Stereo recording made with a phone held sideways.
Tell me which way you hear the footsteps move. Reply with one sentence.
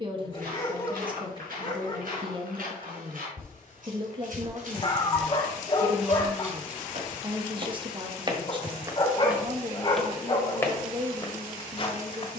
In this clip you hear the footsteps go from the right side to the left.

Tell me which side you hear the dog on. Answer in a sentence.
In this clip you hear the dog on the left.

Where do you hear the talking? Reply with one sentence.
You can hear the talking on the right.